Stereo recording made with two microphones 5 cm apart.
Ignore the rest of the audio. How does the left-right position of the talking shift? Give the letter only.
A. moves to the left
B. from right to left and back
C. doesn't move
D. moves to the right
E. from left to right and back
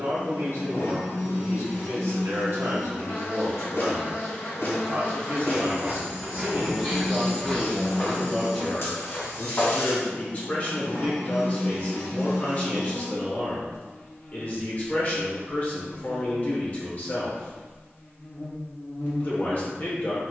A.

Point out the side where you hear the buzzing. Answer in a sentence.
In this clip you hear the buzzing on the left.